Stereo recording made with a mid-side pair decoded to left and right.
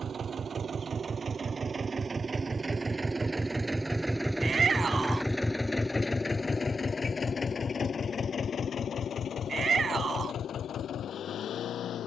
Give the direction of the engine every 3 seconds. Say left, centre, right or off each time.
right, centre, left, left.